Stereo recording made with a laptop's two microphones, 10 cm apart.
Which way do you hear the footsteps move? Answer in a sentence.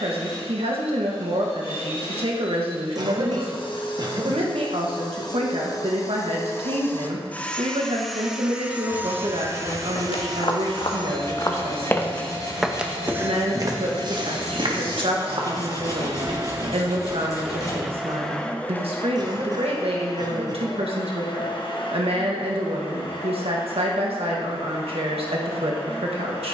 In this clip you hear the footsteps go from the left side to the right.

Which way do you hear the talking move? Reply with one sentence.
You can hear the talking stay in one place.